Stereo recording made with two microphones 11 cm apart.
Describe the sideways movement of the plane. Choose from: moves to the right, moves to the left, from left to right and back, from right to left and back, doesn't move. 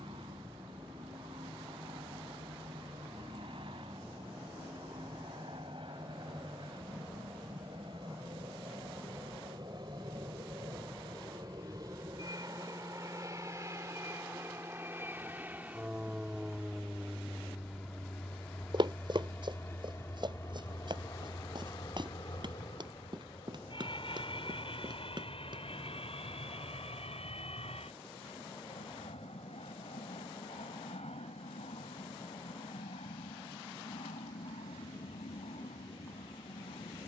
moves to the left.